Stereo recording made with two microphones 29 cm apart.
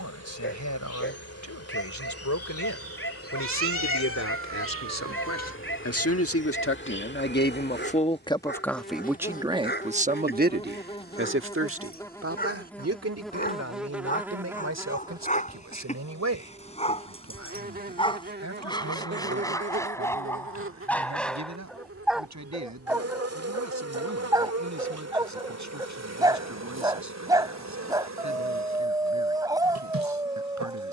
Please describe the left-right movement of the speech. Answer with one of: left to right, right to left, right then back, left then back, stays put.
left to right.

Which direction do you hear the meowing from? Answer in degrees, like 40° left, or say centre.
50° right.